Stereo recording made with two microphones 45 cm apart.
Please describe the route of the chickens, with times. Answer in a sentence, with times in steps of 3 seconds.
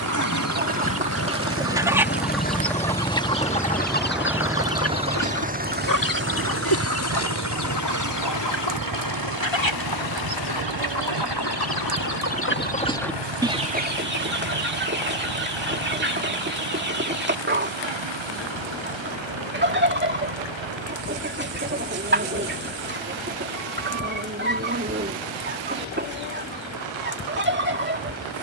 In this clip you hear the chickens in the centre from 0 s, on the left from 3 s, in the centre from 12 s and on the right from 15 s.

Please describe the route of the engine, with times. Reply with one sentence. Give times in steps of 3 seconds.
You can hear the engine on the left from 0 s, in the centre from 3 s and on the right from 6 s.